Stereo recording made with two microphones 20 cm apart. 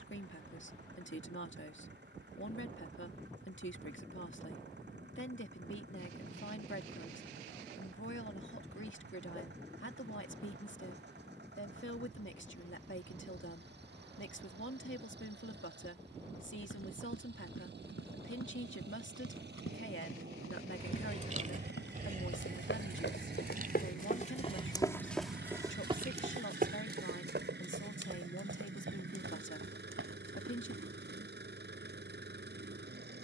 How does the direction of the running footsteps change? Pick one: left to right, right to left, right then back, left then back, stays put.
left to right.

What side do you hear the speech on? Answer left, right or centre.
left.